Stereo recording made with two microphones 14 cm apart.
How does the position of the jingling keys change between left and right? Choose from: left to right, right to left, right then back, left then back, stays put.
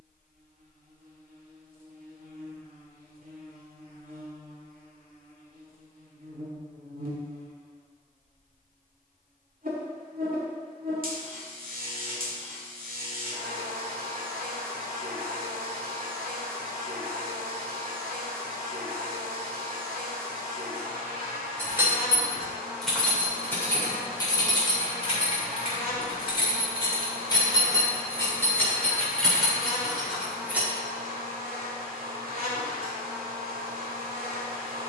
left then back.